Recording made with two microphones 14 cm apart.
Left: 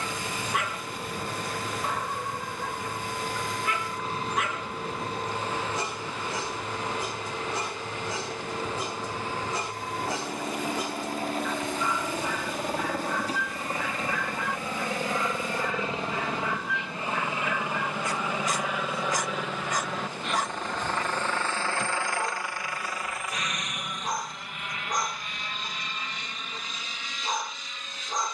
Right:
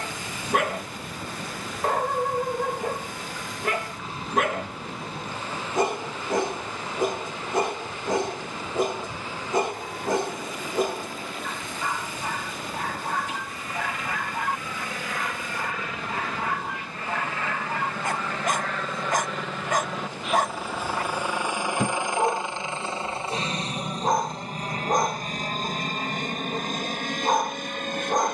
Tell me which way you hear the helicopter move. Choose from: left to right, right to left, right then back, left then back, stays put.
left to right.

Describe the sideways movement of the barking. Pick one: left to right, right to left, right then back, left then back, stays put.
stays put.